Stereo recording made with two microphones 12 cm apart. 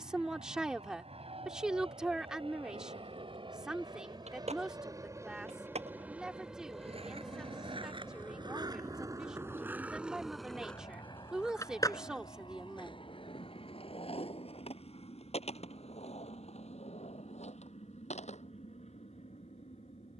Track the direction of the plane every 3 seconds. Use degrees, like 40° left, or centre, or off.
60° right, 30° right, 10° left, 30° left, 50° left, 50° left, 60° left.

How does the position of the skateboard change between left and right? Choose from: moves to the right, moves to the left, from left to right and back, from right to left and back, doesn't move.
moves to the left.